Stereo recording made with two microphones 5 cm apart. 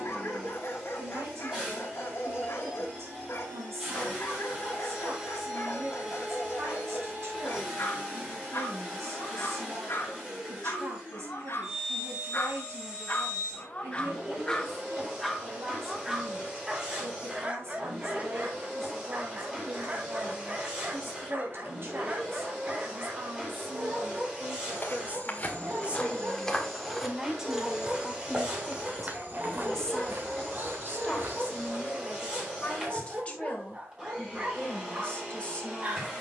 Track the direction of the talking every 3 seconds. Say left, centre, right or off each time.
right, right, right, right, right, right, right, right, right, centre, left, left.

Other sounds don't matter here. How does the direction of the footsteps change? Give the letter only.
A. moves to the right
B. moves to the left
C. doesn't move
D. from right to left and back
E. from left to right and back
A.